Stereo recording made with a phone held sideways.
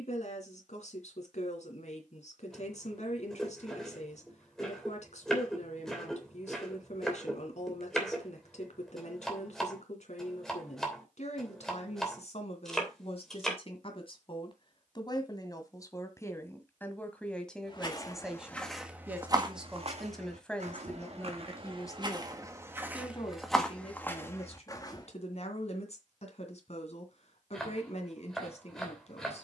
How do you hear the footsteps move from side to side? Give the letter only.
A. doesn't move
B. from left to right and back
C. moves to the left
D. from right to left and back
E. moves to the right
B.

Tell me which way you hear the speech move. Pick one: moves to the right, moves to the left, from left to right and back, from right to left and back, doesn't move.
from left to right and back.